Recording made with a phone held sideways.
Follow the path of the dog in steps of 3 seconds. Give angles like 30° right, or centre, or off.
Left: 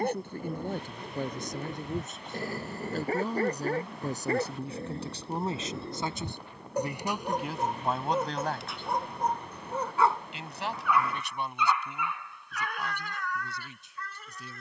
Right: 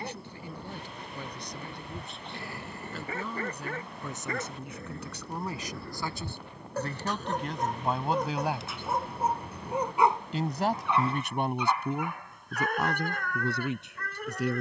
40° left, 30° left, 10° left, 20° right, 50° right.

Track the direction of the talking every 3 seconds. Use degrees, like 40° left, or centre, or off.
50° left, 30° left, centre, 50° right, 70° right.